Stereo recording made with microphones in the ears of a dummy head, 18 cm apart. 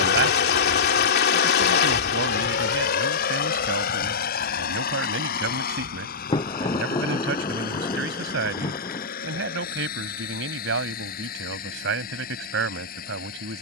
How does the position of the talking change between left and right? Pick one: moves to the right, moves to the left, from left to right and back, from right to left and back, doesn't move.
doesn't move.